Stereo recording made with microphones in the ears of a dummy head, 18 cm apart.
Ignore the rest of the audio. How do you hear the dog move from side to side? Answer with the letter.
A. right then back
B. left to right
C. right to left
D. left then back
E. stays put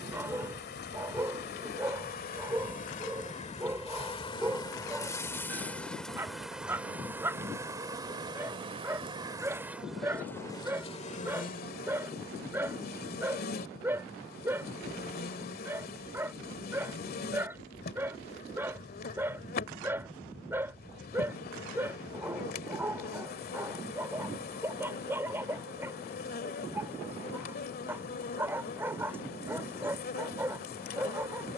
E.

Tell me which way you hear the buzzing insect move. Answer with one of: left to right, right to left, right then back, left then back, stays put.
right then back.